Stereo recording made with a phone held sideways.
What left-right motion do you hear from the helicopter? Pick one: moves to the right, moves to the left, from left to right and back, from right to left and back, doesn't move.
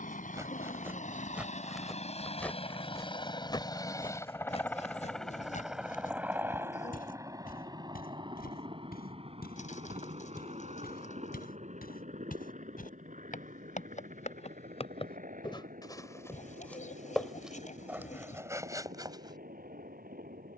moves to the right.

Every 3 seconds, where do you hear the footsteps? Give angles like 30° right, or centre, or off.
10° right, 40° left, 70° left, 80° left, 60° left, 10° left, 20° right.